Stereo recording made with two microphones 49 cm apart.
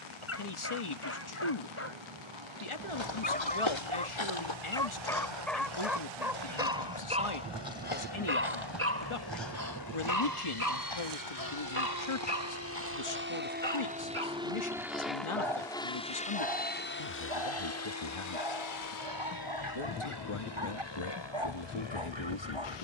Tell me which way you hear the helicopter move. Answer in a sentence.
In this clip you hear the helicopter go from the right side to the left.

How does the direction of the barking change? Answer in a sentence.
You can hear the barking move to the right.